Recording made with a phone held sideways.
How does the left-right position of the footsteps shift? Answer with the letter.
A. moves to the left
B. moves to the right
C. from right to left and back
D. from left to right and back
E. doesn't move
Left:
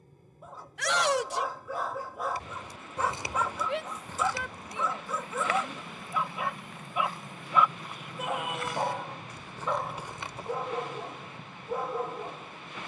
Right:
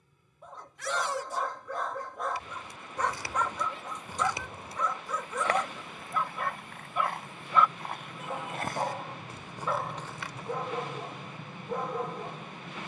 D.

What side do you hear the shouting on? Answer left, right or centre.
left.